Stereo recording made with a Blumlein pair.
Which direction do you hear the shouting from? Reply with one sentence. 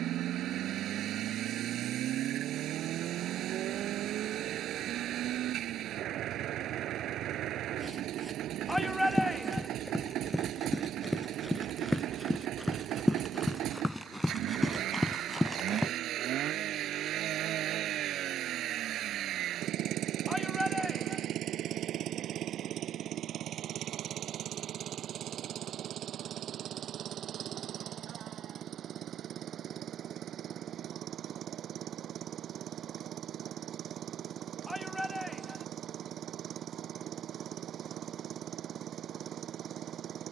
In this clip you hear the shouting in the centre.